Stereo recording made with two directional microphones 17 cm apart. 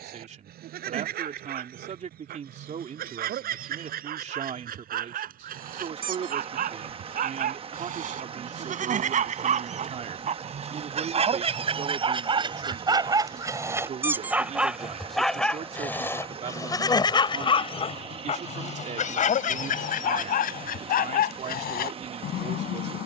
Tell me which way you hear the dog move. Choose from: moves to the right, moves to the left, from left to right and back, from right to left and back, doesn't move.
moves to the left.